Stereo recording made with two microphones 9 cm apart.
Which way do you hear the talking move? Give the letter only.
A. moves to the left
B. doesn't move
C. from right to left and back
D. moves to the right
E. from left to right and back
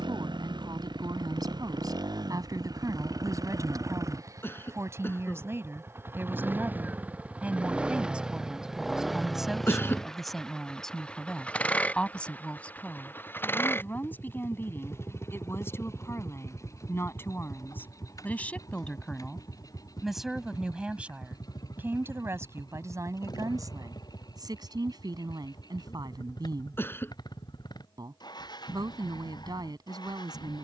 C.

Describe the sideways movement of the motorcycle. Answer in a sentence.
You can hear the motorcycle go from the right side to the left.